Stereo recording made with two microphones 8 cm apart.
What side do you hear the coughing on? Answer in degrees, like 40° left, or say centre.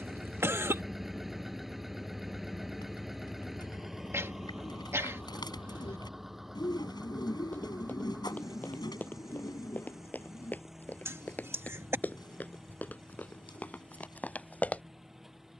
30° right.